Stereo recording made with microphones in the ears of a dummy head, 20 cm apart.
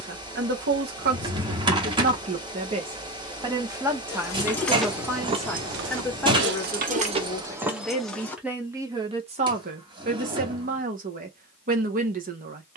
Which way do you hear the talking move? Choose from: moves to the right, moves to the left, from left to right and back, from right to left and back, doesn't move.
from right to left and back.